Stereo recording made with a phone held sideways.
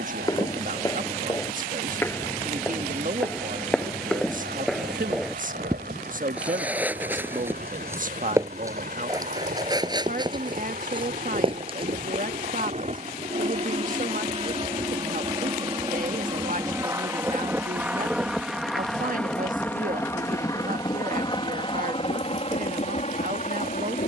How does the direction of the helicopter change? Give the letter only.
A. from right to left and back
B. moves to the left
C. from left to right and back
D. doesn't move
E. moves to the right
B.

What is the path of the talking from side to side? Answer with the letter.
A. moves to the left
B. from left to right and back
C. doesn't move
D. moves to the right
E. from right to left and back
C.